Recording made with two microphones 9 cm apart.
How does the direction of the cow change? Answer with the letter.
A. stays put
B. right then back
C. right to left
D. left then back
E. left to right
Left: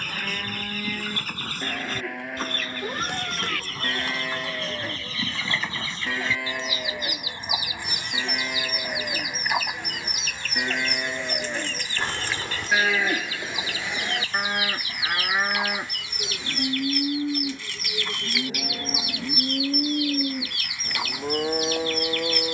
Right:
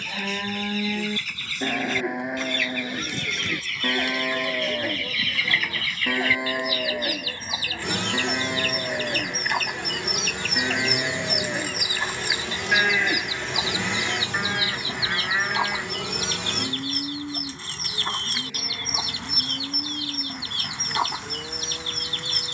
C.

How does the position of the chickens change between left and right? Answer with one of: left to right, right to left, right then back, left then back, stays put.
left to right.